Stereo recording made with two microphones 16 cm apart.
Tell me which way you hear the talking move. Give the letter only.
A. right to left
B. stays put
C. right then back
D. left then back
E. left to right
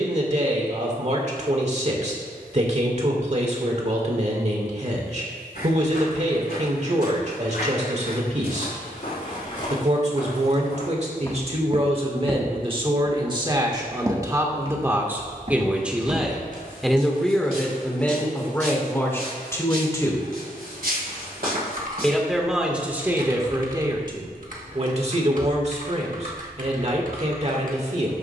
D.